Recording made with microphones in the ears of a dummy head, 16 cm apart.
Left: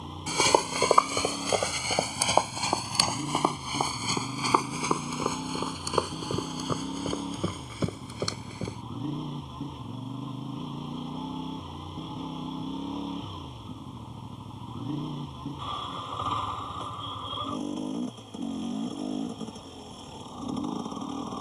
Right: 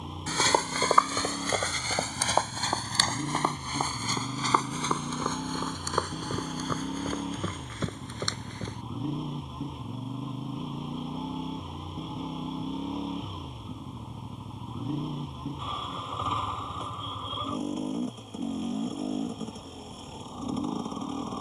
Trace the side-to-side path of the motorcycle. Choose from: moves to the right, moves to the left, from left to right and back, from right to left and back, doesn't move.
doesn't move.